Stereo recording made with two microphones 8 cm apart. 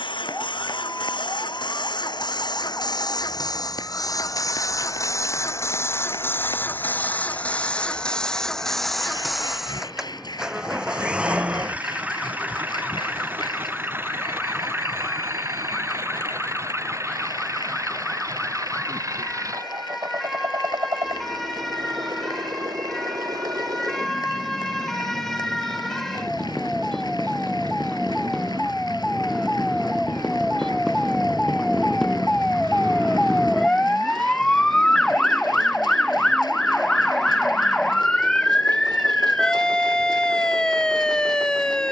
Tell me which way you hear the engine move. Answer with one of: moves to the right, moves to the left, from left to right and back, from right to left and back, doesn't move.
moves to the right.